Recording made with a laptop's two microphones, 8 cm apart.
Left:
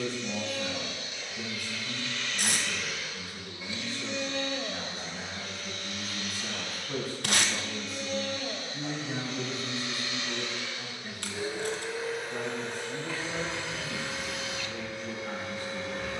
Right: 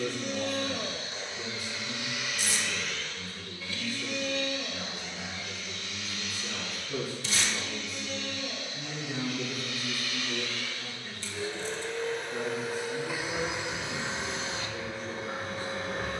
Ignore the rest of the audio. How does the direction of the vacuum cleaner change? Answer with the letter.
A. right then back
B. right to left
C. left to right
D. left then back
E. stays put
D.